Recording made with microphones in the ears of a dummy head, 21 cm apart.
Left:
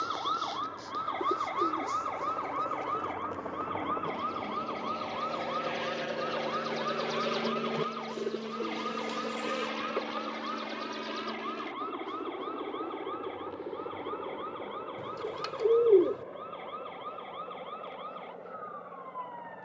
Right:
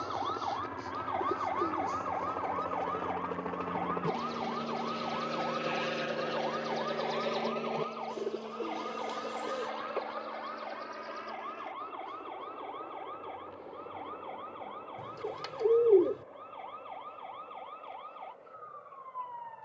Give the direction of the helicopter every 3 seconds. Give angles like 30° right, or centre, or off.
60° right, 30° right, 20° left, 50° left, 60° left, 70° left, 70° left.